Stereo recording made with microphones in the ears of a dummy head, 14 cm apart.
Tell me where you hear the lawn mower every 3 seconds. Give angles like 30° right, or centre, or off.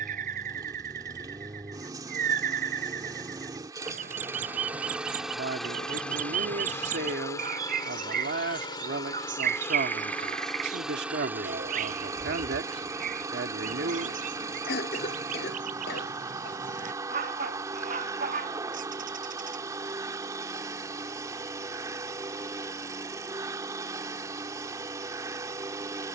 20° right, 10° right, 20° left, centre, 20° right, 20° right, 20° right, 20° right, 20° right.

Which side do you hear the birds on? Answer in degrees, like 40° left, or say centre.
50° right.